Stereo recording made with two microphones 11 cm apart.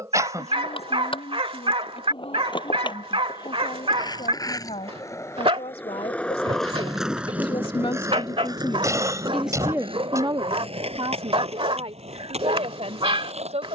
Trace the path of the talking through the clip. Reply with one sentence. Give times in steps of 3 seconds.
In this clip you hear the talking on the left from 0 s and on the right from 9 s.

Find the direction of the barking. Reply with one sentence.
In this clip you hear the barking on the right.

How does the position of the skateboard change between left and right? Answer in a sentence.
In this clip you hear the skateboard go from the left side to the right.